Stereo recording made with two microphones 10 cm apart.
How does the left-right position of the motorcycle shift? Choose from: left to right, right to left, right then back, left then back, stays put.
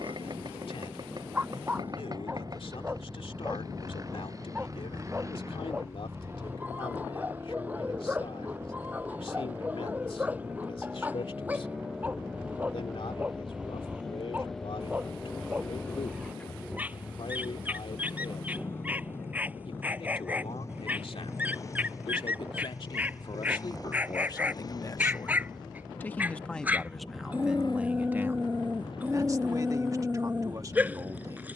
right to left.